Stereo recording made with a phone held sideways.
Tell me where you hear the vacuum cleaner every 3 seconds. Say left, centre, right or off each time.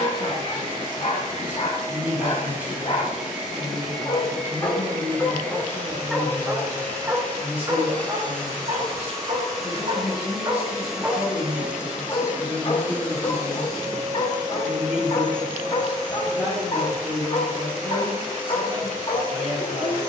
right, centre, centre, centre, right, right, right.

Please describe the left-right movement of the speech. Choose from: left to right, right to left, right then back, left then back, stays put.
stays put.